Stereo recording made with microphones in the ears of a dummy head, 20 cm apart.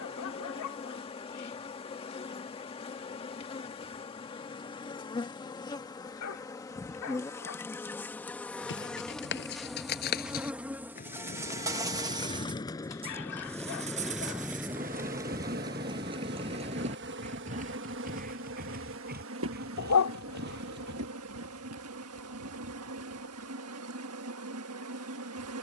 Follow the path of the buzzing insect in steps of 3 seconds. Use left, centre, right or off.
left, left, centre, centre, right, right, right, right, right.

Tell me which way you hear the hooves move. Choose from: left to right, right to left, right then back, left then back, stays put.
left to right.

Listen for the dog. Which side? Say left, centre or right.
left.